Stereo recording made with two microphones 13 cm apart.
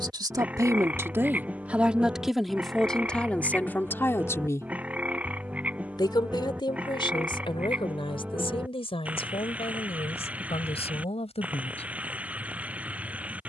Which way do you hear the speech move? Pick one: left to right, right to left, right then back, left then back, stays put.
right to left.